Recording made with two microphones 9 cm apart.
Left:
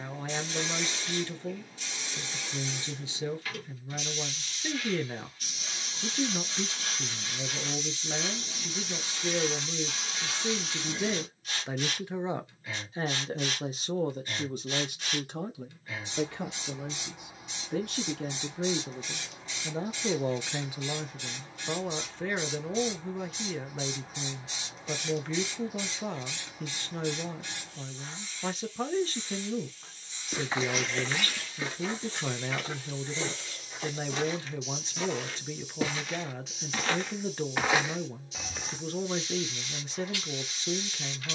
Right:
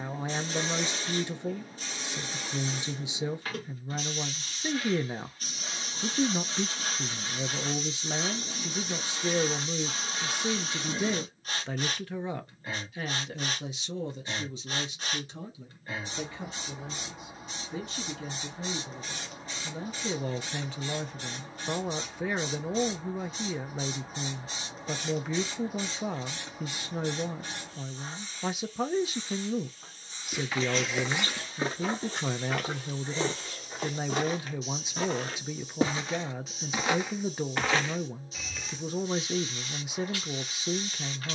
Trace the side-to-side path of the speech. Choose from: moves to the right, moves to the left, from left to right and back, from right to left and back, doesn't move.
from right to left and back.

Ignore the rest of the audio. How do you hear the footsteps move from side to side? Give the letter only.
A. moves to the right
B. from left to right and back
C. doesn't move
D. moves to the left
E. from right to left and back
B.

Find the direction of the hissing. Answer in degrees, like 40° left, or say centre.
40° right.